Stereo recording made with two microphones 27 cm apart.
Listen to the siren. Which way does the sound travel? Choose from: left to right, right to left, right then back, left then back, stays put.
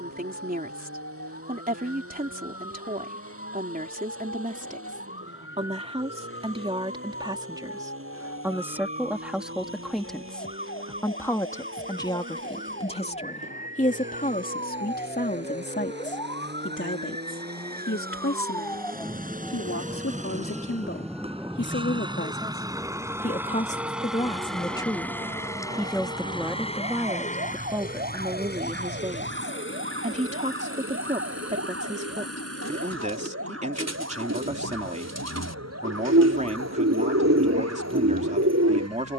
left to right.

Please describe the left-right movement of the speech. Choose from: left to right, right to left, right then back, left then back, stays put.
left then back.